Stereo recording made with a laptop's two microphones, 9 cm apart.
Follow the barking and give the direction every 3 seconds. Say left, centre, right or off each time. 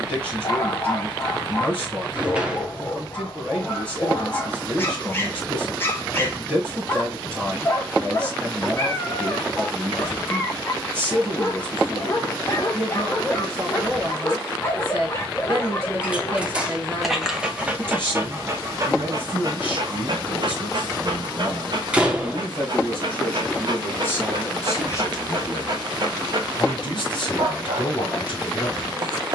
left, left, left, left, left, centre, right, right, right, right.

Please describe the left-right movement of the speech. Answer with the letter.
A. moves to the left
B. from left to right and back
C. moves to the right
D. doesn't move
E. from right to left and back
A.